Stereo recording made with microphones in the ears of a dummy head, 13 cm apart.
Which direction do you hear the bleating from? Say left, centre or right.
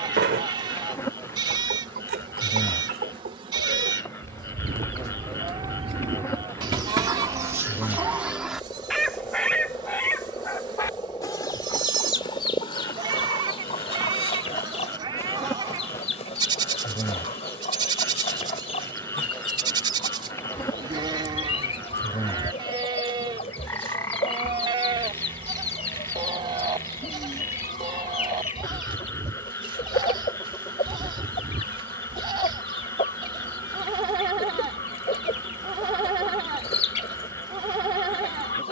right.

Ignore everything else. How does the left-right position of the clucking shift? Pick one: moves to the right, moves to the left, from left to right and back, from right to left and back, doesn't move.
moves to the left.